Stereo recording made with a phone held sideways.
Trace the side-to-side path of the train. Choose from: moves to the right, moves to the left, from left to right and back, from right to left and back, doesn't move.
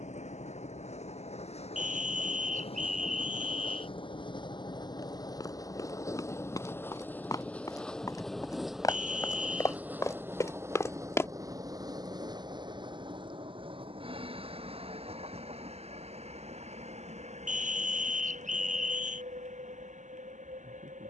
moves to the right.